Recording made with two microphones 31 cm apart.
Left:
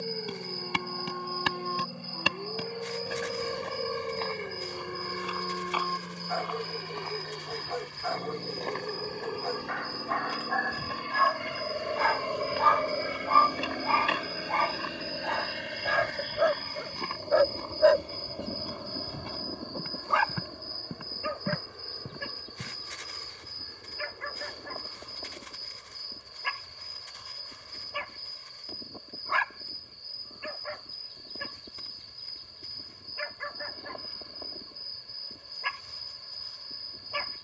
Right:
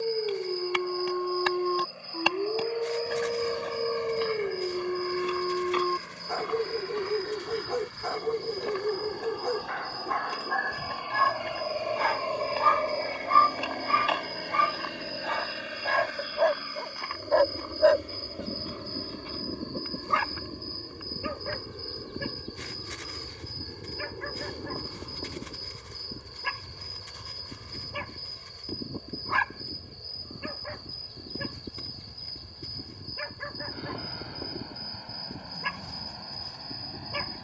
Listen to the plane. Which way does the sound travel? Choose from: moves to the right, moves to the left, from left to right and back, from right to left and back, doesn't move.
moves to the right.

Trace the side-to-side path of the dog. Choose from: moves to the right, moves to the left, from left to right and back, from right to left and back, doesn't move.
from right to left and back.